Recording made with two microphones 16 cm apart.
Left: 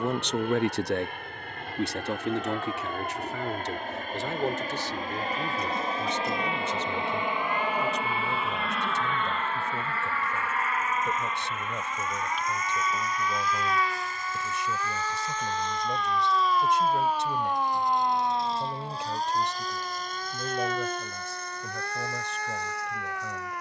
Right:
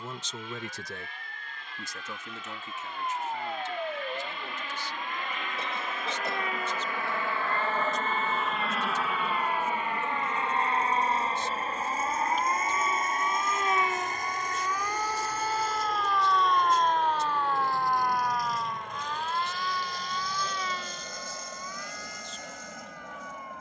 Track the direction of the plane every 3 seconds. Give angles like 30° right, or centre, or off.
60° left, 50° left, 20° left, 20° right, 50° right, 60° right, 60° right, 70° right.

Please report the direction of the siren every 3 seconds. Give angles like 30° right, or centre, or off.
50° right, 50° right, 40° right, 40° right, 20° right, centre, 40° left, 70° left.